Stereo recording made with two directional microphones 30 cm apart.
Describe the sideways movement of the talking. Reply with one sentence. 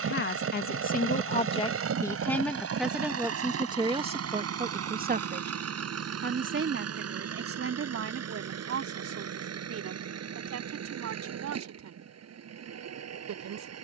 In this clip you hear the talking go from the left side to the right.